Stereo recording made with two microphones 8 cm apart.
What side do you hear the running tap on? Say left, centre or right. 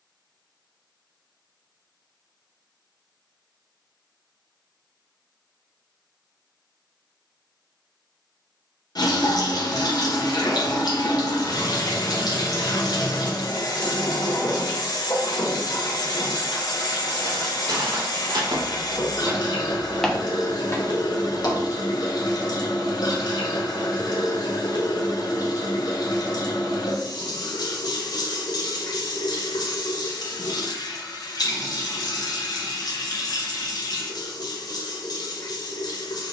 left.